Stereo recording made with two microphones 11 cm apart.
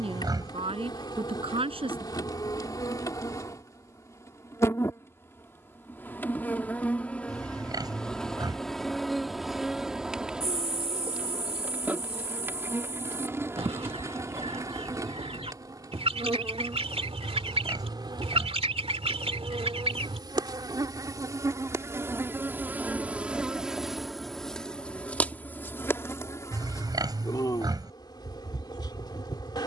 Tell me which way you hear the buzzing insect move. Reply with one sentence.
In this clip you hear the buzzing insect move from left to right and back again.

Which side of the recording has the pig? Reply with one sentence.
You can hear the pig on the right.